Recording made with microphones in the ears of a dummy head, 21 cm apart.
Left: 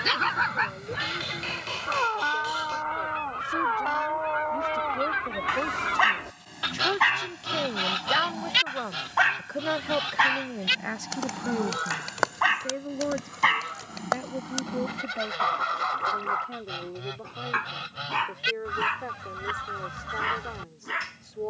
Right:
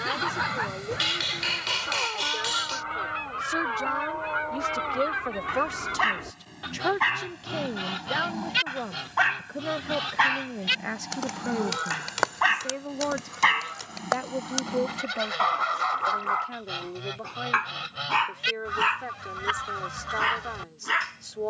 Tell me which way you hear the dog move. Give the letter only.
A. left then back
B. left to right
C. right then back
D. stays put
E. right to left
B.